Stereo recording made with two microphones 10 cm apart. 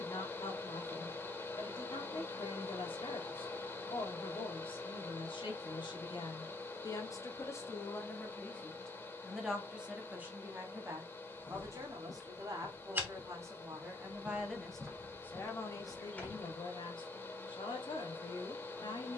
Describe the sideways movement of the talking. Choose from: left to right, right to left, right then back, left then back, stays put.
right then back.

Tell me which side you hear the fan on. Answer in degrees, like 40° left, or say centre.
20° left.